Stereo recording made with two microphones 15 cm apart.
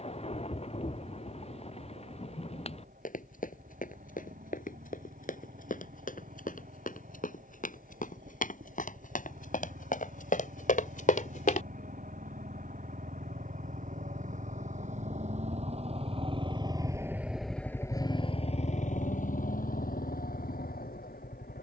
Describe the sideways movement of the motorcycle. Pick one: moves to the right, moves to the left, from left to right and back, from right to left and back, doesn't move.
moves to the left.